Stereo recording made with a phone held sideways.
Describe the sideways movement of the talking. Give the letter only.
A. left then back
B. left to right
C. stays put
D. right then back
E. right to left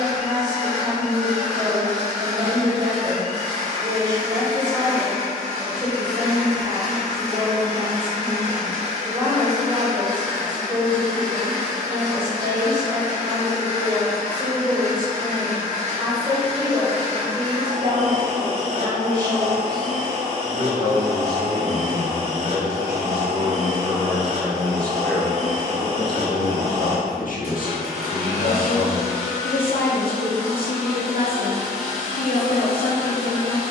E.